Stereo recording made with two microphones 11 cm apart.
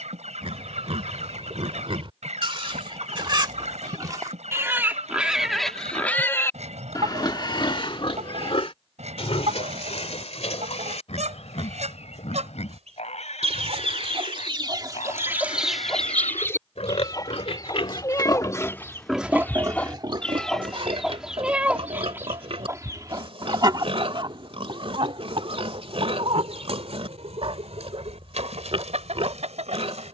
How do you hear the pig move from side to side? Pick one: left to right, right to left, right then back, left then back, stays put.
left then back.